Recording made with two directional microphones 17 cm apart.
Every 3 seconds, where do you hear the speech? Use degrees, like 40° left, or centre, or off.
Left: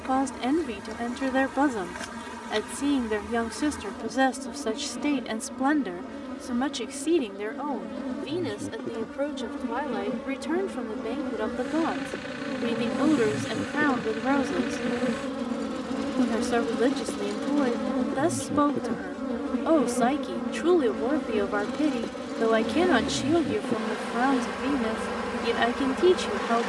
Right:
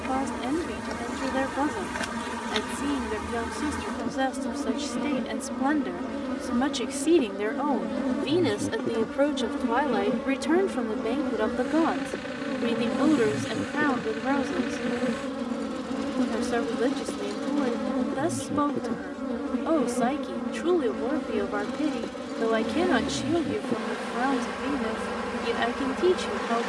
30° left, 30° left, 20° right, 20° right, 10° left, 20° left, 20° left, 20° left, 20° left.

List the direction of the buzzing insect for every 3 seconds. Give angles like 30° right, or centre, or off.
30° right, 30° right, 20° right, 10° right, centre, 10° left, 10° left, 10° left, 10° left.